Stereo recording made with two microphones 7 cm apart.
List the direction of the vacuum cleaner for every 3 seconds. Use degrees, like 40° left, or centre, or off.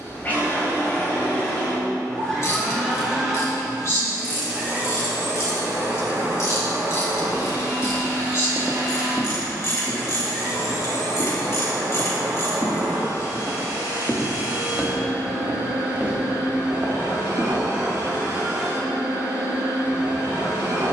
20° left, 20° right, 60° right, 80° right, 80° right, 80° right, 80° right.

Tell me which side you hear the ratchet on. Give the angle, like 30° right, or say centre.
50° left.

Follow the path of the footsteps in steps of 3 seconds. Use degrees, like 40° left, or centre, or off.
off, off, 10° right, 50° left, 30° left, 30° right, off.